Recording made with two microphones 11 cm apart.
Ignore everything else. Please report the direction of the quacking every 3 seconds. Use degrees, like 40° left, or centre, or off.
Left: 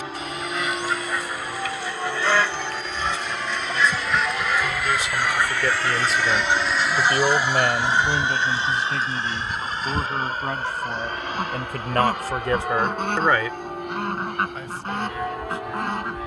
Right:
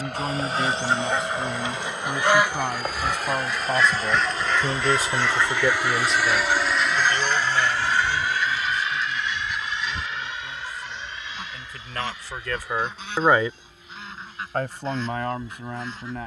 20° right, 10° left, 30° left, 50° left, 50° left, 60° left.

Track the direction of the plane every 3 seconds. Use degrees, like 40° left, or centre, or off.
60° right, 30° right, 10° left, 40° left, 50° left, off.